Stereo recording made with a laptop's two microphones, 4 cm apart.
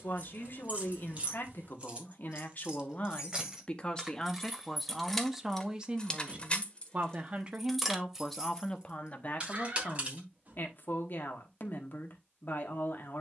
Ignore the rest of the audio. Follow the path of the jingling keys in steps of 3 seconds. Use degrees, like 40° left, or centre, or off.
30° right, 10° right, centre, 30° right, off.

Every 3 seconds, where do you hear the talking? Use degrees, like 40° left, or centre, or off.
50° left, 10° left, 10° right, 50° left, 50° left.